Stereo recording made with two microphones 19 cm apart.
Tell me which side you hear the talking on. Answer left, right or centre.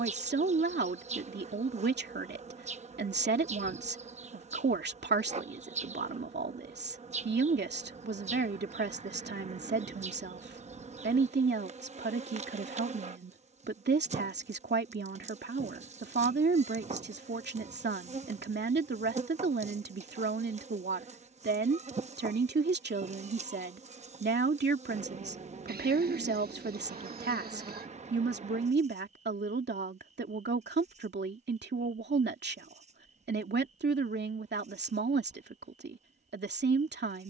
right.